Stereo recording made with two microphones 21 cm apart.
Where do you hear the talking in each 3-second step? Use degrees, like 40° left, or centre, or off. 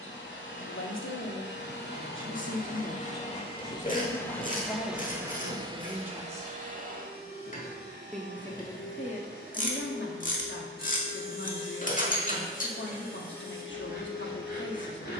70° left, 10° left, centre, 60° left, 60° left.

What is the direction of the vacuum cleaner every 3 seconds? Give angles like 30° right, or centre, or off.
50° left, centre, 50° right, 70° right, 70° right.